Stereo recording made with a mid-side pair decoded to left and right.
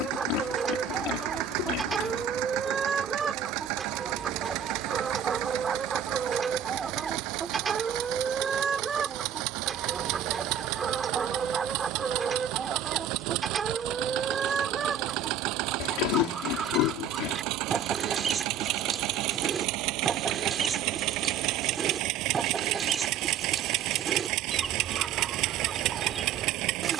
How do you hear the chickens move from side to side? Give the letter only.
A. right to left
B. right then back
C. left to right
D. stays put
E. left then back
D.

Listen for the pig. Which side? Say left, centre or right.
left.